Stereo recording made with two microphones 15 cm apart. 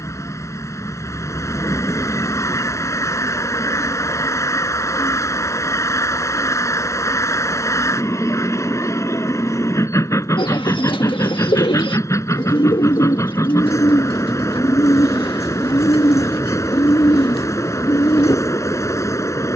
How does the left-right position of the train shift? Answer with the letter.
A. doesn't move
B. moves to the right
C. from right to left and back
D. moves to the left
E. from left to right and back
A.